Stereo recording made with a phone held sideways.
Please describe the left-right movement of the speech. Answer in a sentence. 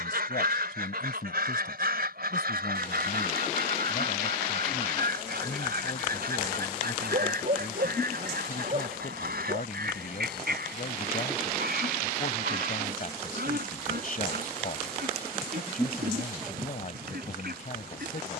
In this clip you hear the speech stay in one place.